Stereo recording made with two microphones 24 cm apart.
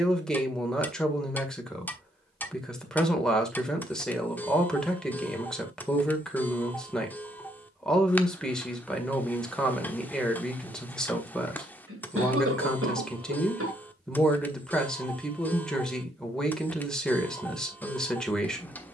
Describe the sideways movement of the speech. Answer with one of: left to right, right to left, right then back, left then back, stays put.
stays put.